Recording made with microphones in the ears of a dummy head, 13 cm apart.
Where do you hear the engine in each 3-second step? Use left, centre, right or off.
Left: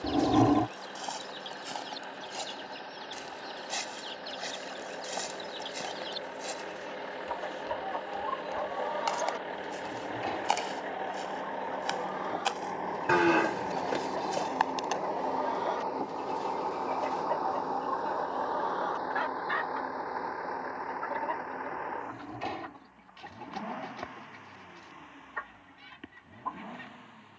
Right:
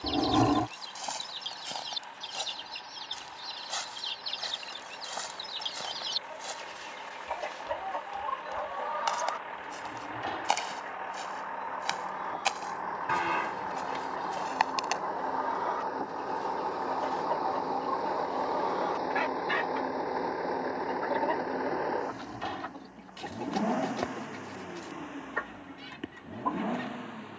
left, left, left, left, left, centre, right, right, right.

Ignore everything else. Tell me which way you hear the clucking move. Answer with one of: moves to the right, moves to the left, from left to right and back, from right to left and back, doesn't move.
from right to left and back.